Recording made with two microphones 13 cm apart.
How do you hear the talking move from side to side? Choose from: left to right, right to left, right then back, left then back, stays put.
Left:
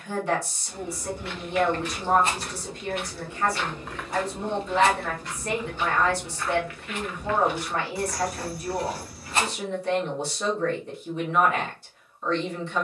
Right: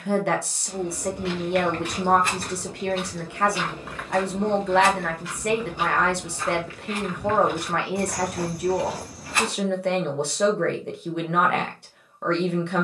stays put.